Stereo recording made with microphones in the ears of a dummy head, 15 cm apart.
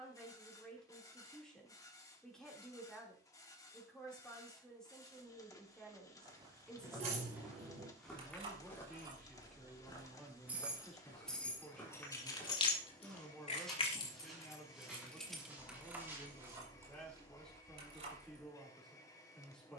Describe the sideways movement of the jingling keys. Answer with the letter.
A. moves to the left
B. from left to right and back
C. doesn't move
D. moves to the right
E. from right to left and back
E.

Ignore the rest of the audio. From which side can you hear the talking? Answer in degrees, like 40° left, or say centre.
centre.